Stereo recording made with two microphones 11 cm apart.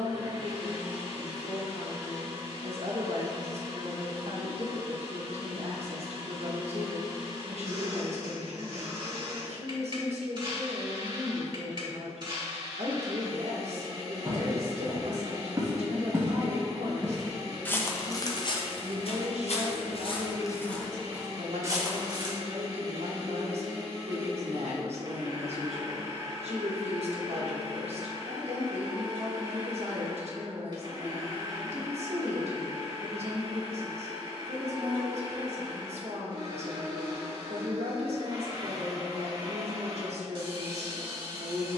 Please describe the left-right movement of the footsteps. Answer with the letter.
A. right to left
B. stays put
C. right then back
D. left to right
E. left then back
E.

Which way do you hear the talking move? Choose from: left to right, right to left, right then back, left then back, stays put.
stays put.